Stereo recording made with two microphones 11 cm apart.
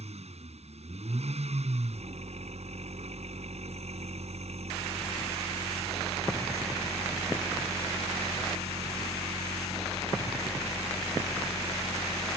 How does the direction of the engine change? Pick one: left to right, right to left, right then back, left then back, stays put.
stays put.